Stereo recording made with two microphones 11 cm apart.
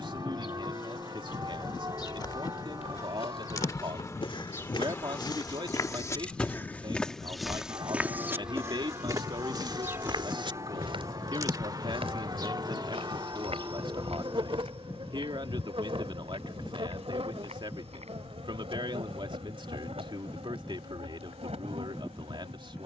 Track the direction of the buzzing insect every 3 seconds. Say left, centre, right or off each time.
left, left, centre, right, right, right, right, right.